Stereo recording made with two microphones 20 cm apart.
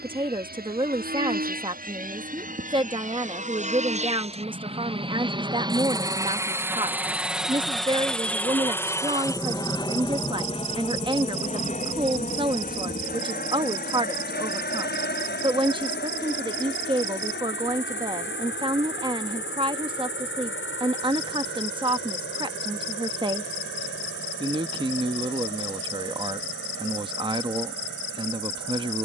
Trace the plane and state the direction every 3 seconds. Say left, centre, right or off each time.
right, right, centre, left, left, left, left, left, left, left.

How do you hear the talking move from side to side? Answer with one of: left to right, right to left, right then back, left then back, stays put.
stays put.